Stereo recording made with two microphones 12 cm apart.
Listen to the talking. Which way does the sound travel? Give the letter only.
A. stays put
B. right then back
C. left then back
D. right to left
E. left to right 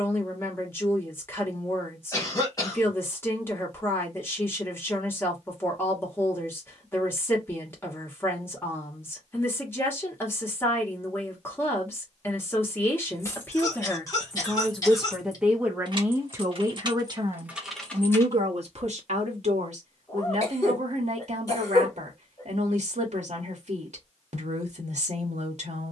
E.